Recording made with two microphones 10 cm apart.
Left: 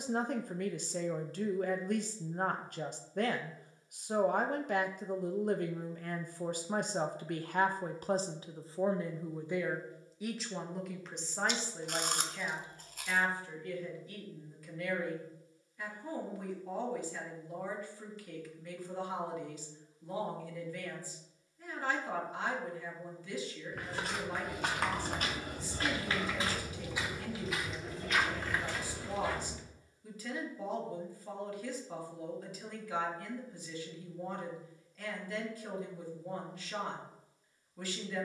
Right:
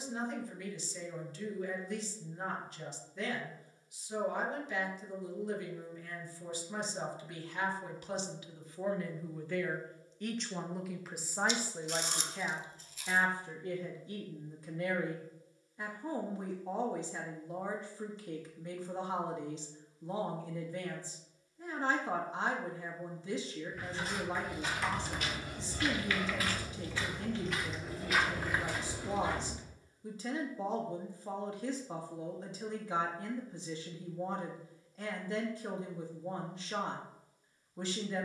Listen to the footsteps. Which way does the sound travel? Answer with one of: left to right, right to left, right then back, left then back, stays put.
left to right.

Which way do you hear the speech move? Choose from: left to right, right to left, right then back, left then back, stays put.
left to right.